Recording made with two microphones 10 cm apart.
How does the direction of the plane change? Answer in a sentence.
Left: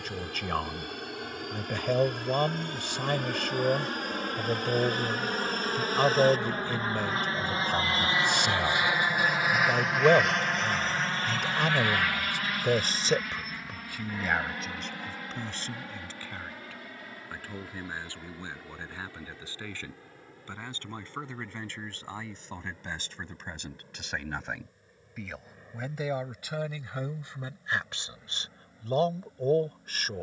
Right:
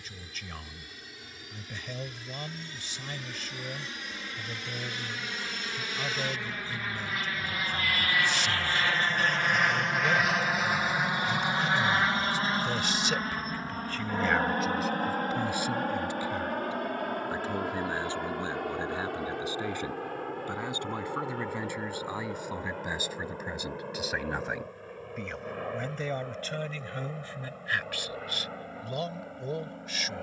In this clip you hear the plane travel towards the right.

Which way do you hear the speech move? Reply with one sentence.
In this clip you hear the speech move from left to right and back again.